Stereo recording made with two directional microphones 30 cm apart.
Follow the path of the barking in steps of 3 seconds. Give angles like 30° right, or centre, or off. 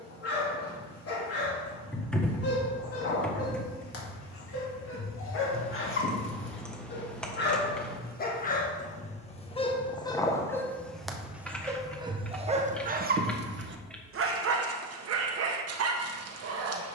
50° left, 50° left, 30° left, 10° left, 30° right, 50° right.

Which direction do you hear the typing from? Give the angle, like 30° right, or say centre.
centre.